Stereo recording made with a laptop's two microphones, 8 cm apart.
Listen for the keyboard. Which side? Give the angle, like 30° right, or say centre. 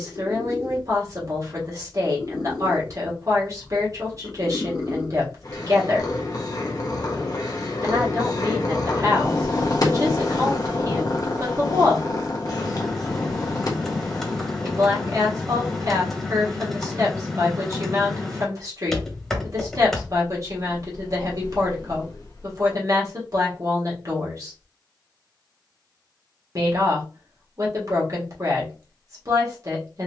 centre.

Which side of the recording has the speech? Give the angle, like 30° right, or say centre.
40° right.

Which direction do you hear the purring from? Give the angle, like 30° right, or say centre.
50° left.